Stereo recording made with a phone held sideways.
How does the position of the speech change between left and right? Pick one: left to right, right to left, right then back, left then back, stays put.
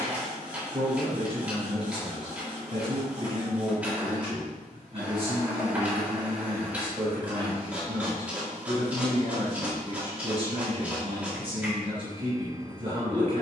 stays put.